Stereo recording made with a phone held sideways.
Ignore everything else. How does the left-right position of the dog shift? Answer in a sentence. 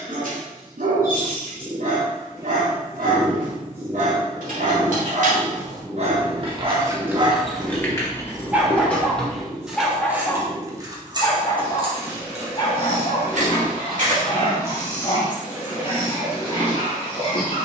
In this clip you hear the dog move to the left.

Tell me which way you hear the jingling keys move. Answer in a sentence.
In this clip you hear the jingling keys move from right to left and back again.